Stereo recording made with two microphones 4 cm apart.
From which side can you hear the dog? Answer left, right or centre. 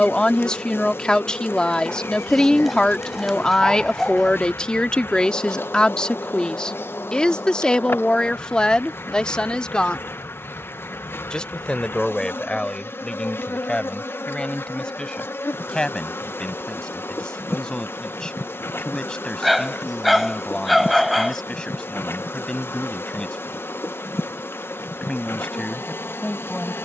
centre.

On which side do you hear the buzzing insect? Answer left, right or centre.
left.